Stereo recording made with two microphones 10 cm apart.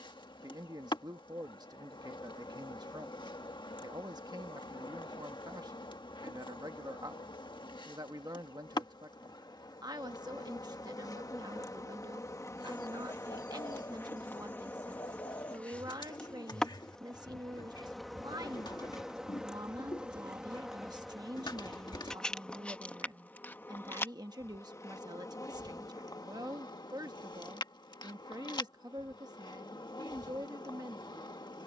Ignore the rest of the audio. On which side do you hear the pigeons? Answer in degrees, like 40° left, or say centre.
50° left.